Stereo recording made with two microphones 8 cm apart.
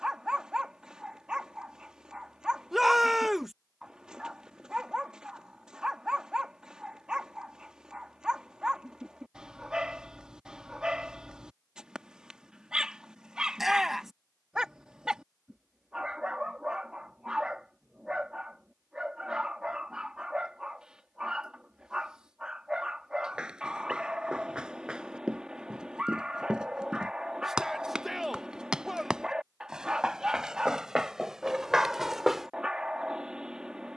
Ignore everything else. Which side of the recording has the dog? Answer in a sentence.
You can hear the dog in the centre.